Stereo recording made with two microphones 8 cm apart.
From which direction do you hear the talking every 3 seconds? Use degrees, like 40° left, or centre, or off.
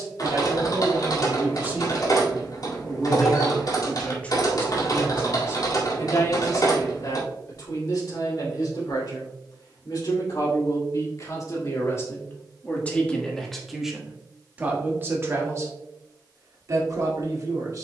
30° right, 20° left, 50° left, 50° left, 10° left, 40° right.